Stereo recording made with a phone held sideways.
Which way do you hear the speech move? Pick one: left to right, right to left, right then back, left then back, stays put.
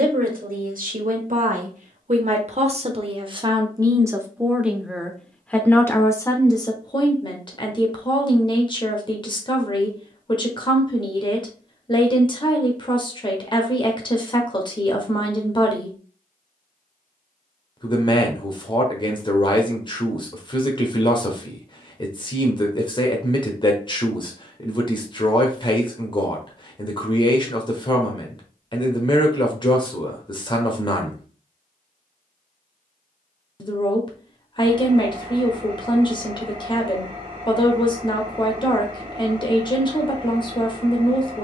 right to left.